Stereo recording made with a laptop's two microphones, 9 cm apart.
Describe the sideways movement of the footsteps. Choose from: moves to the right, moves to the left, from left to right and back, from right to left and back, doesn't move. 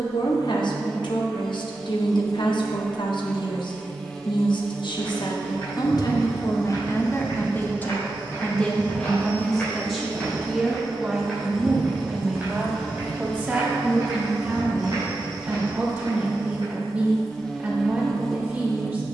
moves to the right.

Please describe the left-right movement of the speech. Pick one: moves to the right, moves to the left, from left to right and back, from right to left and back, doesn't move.
moves to the right.